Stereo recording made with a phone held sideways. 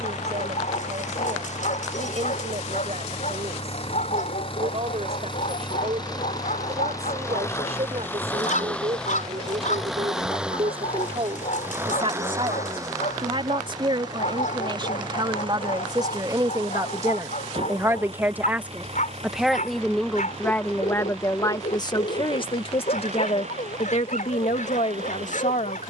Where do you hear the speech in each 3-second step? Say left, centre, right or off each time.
right, right, right, right, right, right, centre, left, left.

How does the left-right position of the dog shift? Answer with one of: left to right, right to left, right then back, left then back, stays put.
stays put.